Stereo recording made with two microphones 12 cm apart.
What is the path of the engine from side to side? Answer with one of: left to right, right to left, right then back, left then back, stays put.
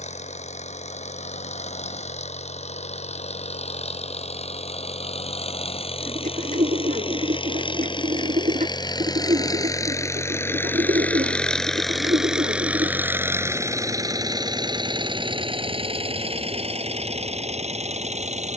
left to right.